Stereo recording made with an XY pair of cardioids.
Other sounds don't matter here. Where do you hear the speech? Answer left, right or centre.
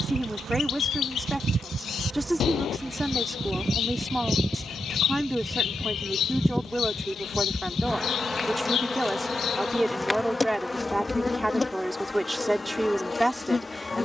centre.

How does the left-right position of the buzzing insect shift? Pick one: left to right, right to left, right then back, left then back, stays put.
right to left.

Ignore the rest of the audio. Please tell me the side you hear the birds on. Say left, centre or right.
left.